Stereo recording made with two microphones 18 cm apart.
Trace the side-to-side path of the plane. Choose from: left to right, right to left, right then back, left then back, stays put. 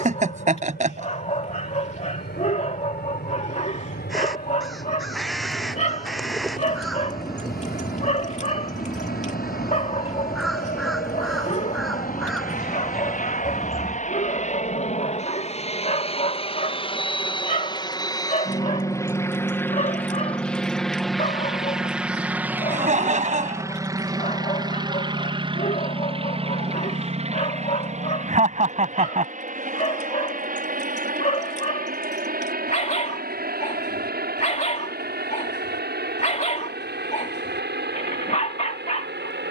left to right.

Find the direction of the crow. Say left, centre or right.
centre.